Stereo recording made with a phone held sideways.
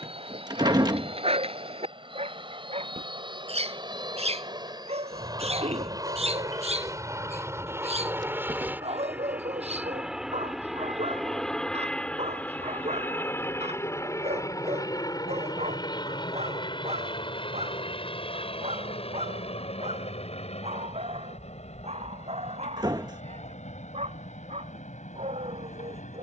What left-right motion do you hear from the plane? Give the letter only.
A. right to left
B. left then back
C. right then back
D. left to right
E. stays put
A.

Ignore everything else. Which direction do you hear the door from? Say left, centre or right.
right.